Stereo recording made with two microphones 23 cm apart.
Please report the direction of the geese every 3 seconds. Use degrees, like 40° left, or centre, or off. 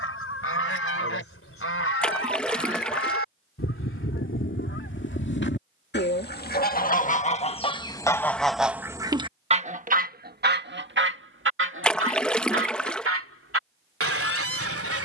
70° left, 60° left, 20° left, 40° right, 70° right.